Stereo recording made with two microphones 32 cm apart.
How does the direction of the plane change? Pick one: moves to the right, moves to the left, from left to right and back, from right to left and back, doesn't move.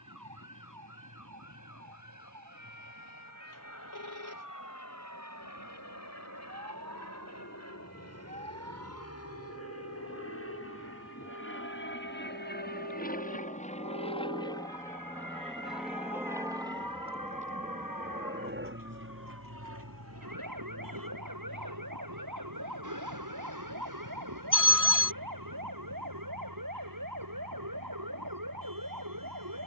moves to the right.